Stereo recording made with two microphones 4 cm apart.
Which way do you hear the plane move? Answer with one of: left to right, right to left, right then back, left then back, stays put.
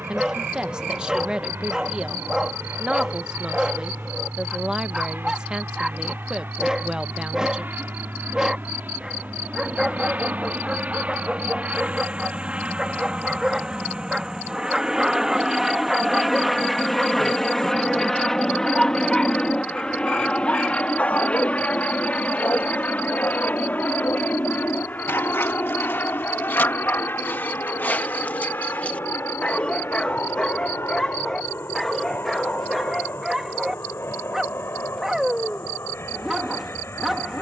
right to left.